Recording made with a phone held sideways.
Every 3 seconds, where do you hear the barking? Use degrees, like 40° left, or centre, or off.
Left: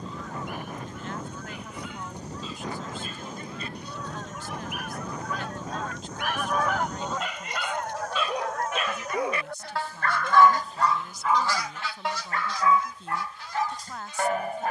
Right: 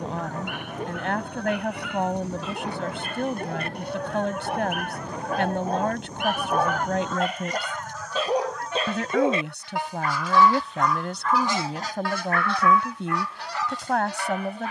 70° right, 70° right, 50° right, 10° right, 40° left.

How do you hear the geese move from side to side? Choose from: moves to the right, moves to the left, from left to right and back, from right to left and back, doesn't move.
from right to left and back.